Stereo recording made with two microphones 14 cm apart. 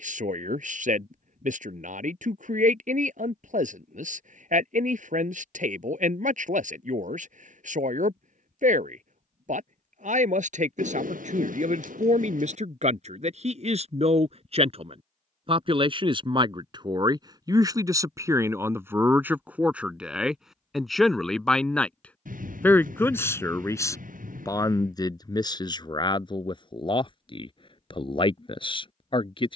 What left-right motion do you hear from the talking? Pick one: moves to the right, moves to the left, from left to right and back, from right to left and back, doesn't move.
moves to the left.